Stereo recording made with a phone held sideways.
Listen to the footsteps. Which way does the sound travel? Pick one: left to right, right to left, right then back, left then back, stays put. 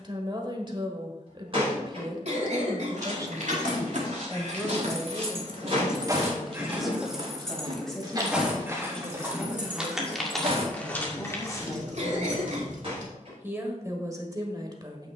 right to left.